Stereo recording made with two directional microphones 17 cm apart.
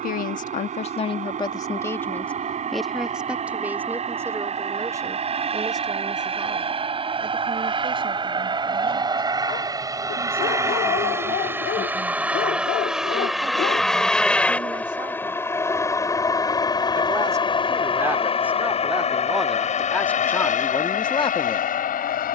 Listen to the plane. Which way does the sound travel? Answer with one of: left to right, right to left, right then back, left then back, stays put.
right to left.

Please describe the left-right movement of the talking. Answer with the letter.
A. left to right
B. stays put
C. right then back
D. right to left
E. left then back
C.